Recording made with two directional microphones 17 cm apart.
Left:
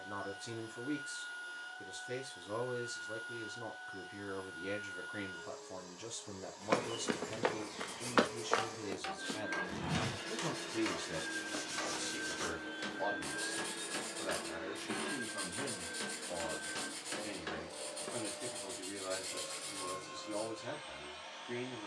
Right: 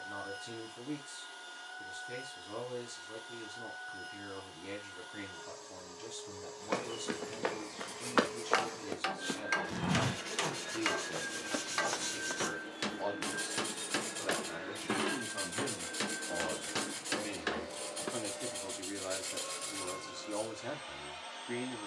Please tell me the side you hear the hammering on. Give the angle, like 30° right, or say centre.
40° right.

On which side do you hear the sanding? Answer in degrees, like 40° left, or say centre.
20° right.